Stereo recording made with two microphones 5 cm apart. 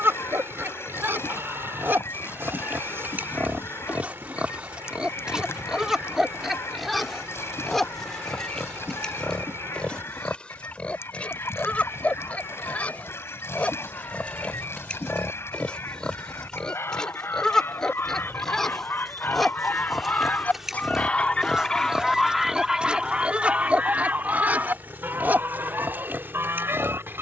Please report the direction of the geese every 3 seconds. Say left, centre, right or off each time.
left, left, left, left, left, left, left, centre, right.